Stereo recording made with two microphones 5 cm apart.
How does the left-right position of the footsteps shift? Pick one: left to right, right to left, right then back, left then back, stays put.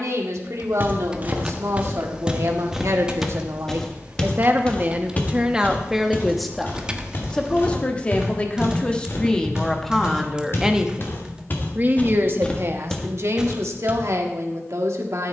left then back.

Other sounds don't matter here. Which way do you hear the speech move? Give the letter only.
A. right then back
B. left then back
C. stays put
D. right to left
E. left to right
B.